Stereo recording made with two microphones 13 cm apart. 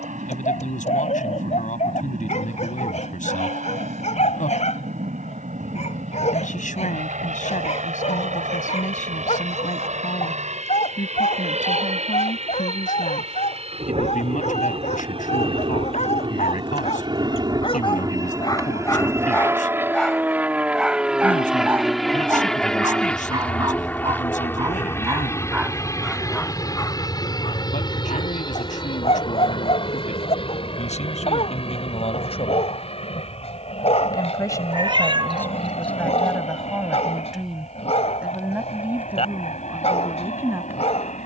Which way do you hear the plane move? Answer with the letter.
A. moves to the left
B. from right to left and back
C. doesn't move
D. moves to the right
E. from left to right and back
A.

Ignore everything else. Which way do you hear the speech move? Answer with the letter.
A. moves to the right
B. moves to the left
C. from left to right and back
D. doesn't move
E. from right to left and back
A.